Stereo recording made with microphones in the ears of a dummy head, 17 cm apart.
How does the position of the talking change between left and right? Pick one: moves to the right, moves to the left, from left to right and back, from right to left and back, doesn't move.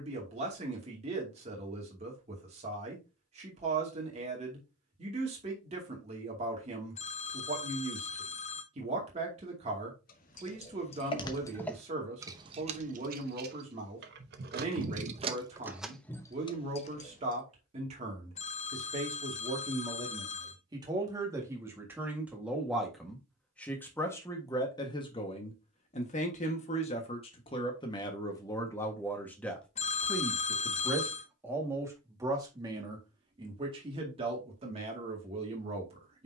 from right to left and back.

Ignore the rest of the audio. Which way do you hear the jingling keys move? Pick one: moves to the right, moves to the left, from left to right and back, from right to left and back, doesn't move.
from left to right and back.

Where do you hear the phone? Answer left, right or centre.
left.